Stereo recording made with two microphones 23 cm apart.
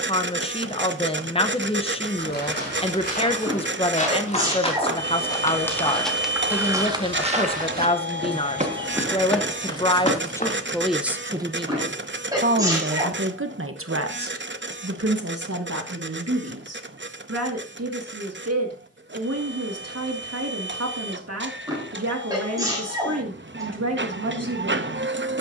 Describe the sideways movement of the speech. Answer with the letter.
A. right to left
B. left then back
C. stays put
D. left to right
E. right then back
D.